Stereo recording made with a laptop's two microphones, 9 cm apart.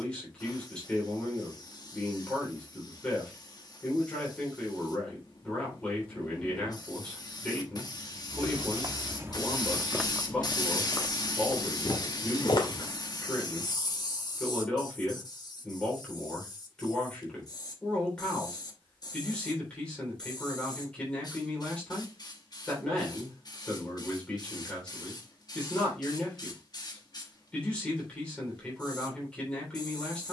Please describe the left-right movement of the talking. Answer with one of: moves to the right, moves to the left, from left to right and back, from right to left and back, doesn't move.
doesn't move.